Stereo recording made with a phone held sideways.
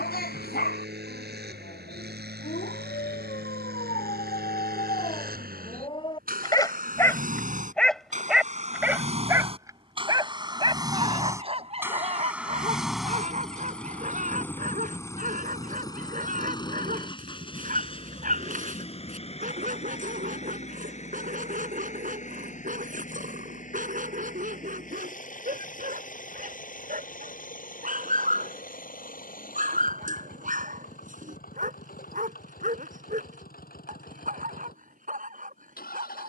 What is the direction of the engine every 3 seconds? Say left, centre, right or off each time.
right, right, right, right, centre, left, left, left, left, left, left, left.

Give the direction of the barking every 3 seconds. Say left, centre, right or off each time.
left, left, centre, right, right, right, right, right, right, right, right, right.